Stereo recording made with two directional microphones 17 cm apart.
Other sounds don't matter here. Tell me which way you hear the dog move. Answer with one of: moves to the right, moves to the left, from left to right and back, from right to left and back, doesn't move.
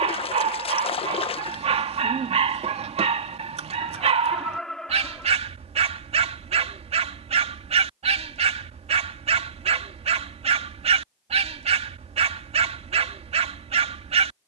doesn't move.